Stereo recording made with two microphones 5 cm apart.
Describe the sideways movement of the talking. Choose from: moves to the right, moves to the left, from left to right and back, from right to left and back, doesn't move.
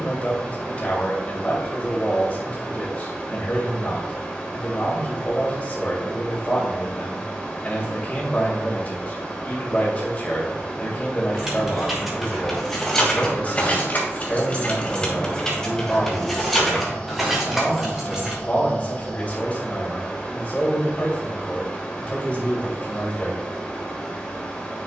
doesn't move.